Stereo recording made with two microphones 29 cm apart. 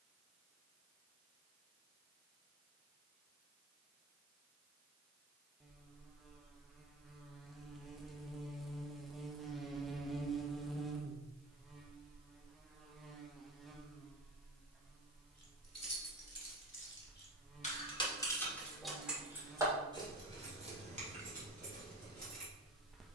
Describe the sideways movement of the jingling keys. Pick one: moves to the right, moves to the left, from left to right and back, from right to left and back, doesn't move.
moves to the right.